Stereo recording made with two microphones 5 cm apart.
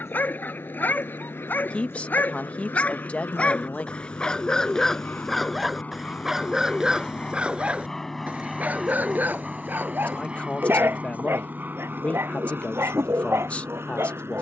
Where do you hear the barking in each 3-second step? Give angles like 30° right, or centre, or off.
40° left, 10° left, 20° right, 40° right, 60° right.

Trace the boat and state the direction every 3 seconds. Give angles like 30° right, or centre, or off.
50° left, 40° left, 10° left, 20° right, 50° right.